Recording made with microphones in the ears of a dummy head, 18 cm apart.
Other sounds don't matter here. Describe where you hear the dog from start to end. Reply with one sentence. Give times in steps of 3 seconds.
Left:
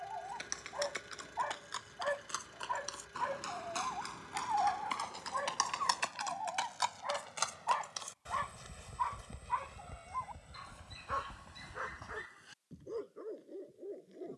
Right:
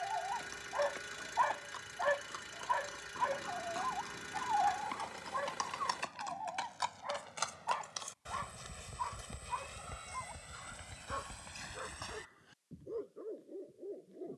You can hear the dog on the right from 0 s, in the centre from 3 s and on the left from 6 s.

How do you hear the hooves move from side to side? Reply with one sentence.
In this clip you hear the hooves travel towards the right.